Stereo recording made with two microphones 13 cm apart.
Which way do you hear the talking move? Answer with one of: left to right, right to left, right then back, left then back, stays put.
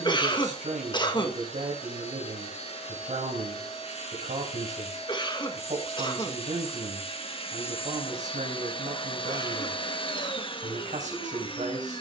stays put.